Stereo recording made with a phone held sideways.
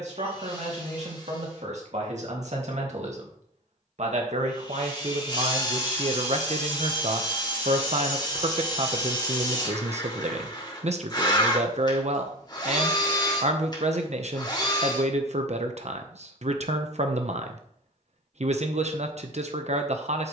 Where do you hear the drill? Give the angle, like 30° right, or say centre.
30° left.